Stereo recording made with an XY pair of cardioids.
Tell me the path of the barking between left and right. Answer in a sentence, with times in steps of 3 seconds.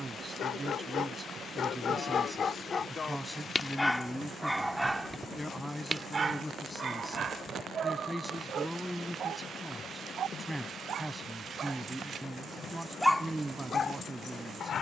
In this clip you hear the barking on the left from 0 s, in the centre from 3 s, on the right from 6 s and on the left from 12 s.